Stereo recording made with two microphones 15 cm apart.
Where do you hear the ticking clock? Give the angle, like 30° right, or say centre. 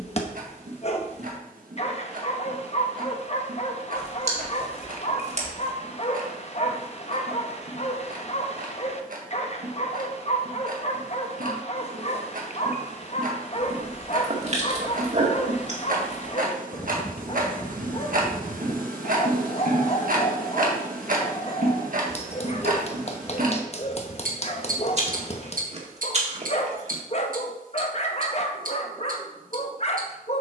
70° right.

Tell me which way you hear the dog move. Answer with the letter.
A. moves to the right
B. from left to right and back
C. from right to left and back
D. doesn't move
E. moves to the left
D.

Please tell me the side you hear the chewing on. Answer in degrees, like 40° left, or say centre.
50° right.